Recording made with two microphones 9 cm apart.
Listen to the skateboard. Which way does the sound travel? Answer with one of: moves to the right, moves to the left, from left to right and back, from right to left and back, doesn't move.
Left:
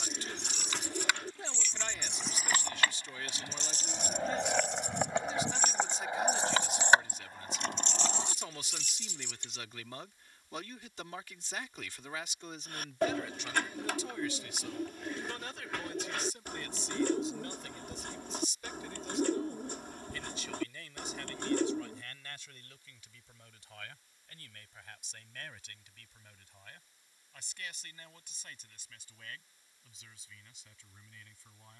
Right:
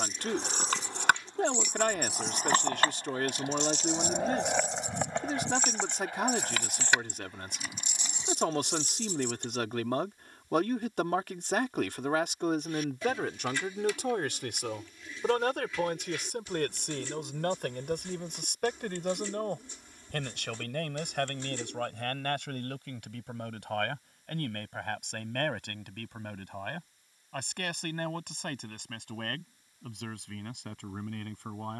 moves to the left.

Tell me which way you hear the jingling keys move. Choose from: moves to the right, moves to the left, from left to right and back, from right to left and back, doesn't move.
from right to left and back.